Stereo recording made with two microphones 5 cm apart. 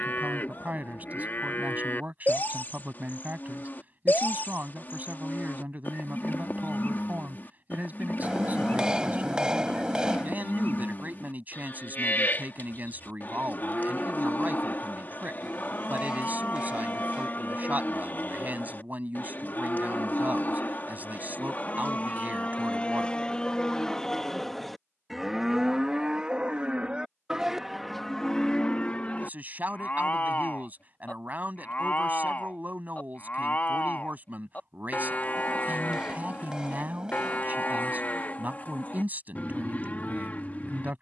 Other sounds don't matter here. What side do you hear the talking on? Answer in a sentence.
In this clip you hear the talking on the right.